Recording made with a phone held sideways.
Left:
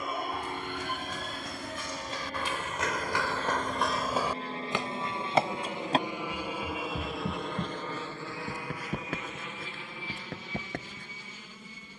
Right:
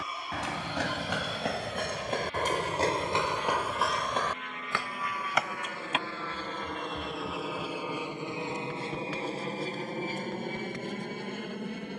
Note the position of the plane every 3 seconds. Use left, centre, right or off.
left, left, centre, right.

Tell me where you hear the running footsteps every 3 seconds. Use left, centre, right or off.
right, centre, left, left.